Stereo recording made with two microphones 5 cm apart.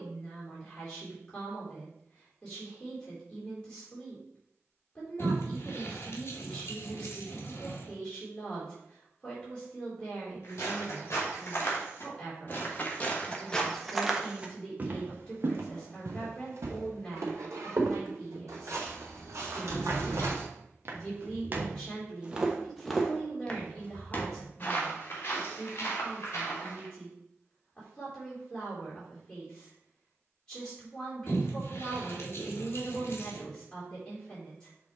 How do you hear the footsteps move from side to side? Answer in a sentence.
In this clip you hear the footsteps go right and come back.